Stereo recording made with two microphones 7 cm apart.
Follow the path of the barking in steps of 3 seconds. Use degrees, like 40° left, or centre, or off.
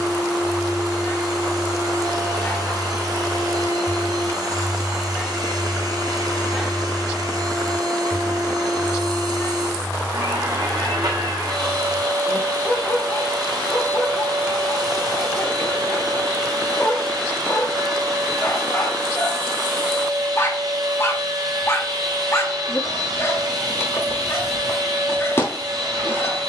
30° left, 10° left, 10° left, 40° left, 40° left, 40° left, 40° left, 40° left, 40° left.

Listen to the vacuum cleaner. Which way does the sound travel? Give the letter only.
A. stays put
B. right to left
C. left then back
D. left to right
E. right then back
A.